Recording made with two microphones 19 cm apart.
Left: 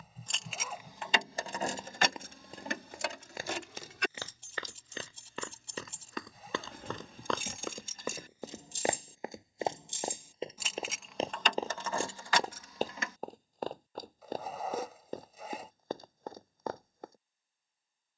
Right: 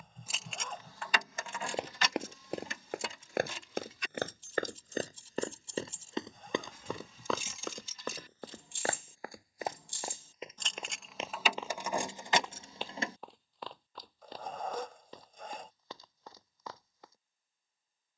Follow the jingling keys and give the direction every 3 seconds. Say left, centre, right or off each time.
left, left, left, centre, right, off.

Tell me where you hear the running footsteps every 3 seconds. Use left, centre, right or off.
right, right, centre, left, left, left.